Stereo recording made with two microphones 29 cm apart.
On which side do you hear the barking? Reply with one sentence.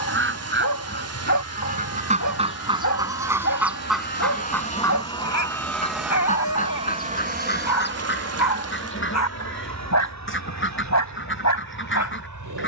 You can hear the barking on the left.